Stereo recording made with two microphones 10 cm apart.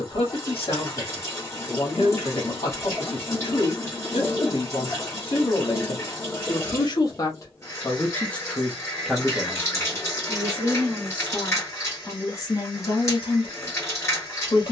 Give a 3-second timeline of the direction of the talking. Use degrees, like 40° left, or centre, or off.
70° left, 70° left, 30° left, 10° right, 50° left.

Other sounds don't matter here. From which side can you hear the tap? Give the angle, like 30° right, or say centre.
30° left.